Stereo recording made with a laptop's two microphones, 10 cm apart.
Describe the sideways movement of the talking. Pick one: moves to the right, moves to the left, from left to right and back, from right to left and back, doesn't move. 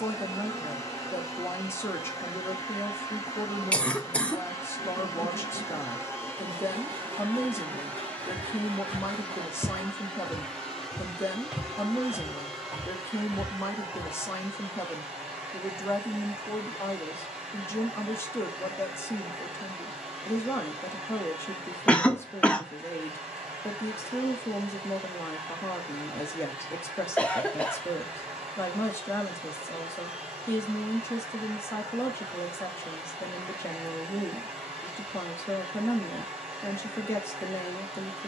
doesn't move.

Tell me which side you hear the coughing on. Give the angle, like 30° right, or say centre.
10° left.